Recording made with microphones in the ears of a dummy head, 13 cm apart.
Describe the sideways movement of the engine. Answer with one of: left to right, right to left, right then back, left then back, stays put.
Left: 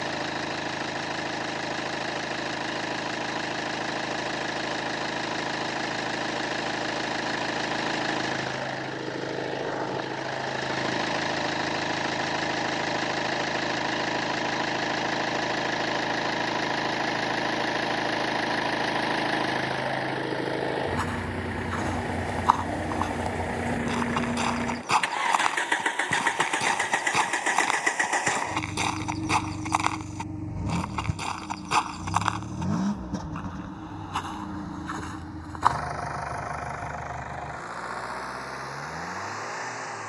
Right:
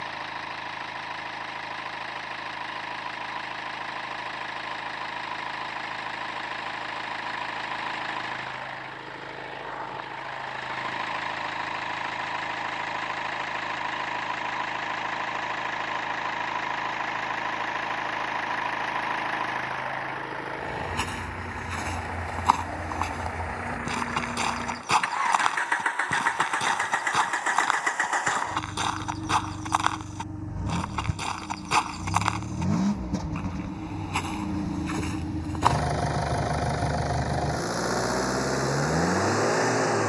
left to right.